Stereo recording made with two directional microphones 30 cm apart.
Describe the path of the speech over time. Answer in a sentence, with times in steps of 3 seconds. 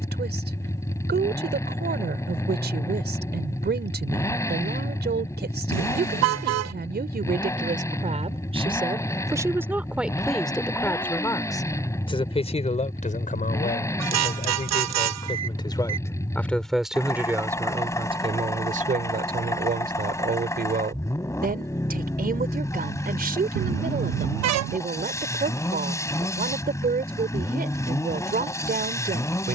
You can hear the speech on the right from 0 s, in the centre from 9 s, on the left from 12 s, in the centre from 15 s and on the right from 18 s.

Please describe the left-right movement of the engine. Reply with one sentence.
In this clip you hear the engine stay in one place.